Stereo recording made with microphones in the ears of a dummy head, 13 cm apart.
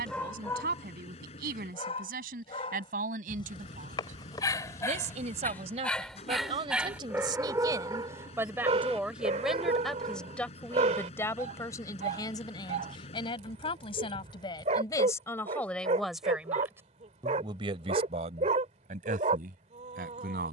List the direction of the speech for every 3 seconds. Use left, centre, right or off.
right, right, right, centre, left, centre, right.